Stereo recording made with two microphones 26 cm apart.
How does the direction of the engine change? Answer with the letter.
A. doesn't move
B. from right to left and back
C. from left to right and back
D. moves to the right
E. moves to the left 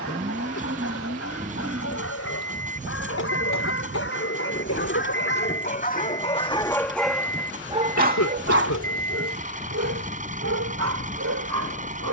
A.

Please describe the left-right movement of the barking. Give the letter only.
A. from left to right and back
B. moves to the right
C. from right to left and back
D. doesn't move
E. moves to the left
B.